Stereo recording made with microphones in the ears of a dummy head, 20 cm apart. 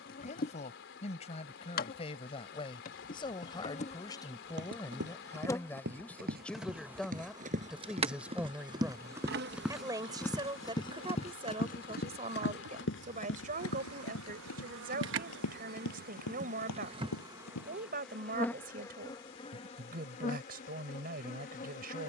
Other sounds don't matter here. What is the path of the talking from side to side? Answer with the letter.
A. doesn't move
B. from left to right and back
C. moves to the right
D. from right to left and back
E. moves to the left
C.